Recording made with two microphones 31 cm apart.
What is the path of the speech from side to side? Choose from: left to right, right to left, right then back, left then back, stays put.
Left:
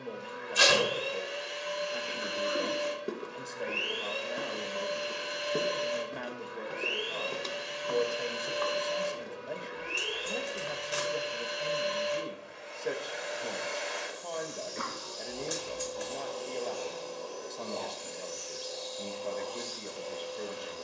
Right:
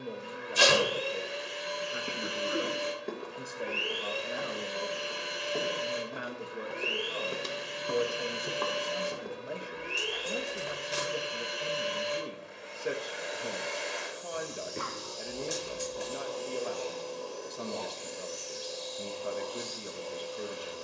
stays put.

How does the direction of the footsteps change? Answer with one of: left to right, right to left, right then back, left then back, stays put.
left then back.